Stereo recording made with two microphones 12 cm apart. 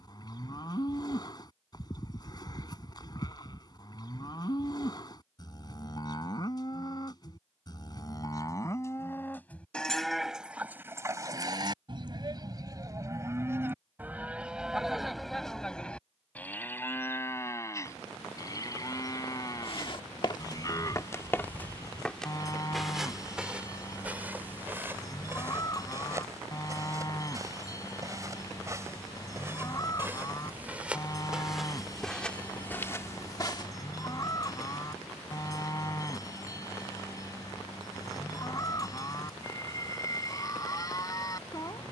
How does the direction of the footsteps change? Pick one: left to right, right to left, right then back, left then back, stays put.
right then back.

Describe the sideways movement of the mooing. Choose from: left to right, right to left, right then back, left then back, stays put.
right then back.